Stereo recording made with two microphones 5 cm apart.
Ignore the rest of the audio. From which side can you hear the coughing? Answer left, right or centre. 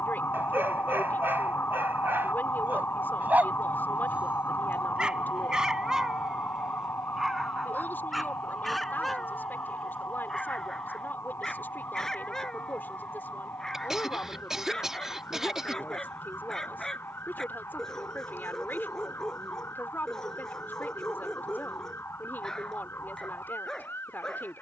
centre.